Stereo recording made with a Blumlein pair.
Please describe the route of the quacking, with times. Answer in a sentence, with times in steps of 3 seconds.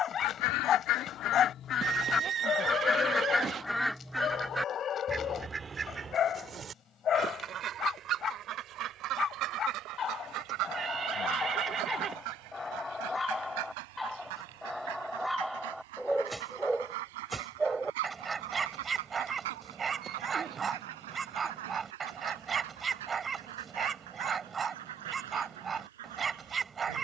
You can hear the quacking on the left from 0 s, in the centre from 3 s and on the right from 6 s.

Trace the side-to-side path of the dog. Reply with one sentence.
In this clip you hear the dog move to the right.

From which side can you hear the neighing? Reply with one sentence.
In this clip you hear the neighing on the right.